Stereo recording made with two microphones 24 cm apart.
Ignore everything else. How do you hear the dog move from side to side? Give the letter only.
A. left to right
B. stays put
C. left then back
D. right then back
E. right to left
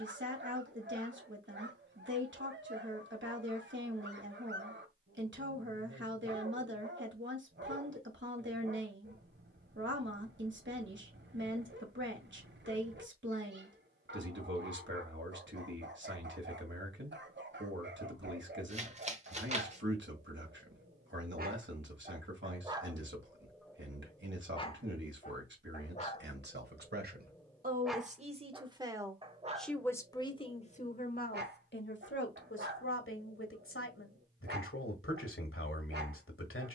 C.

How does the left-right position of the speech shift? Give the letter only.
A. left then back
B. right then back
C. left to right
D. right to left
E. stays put
D.